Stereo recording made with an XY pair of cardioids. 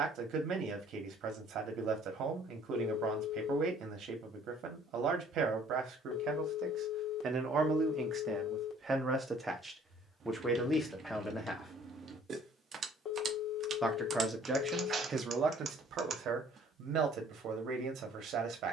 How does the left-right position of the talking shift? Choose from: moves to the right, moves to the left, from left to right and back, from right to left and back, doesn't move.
from right to left and back.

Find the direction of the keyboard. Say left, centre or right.
right.